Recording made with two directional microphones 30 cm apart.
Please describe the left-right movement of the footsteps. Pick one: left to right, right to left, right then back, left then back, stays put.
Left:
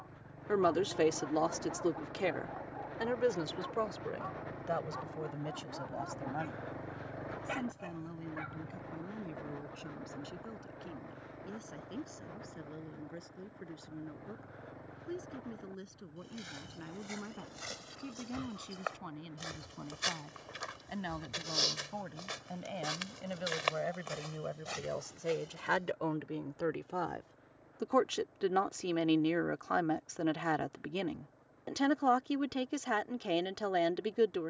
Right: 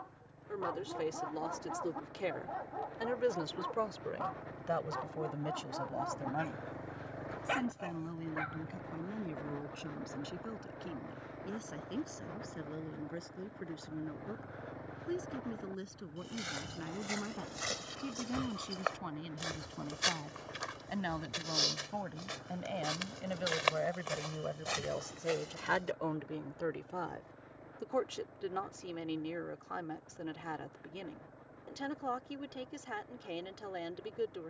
left then back.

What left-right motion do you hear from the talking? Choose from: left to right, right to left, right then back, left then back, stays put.
right then back.